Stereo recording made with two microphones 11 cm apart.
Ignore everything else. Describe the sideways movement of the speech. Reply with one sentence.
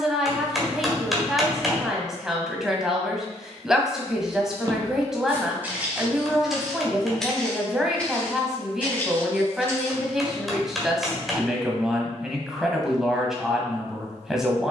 You can hear the speech stay put.